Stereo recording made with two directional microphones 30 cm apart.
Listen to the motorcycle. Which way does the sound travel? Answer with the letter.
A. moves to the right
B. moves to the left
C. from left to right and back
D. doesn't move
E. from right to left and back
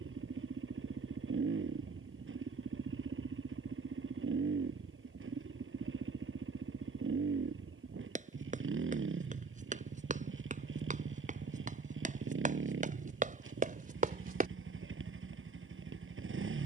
D.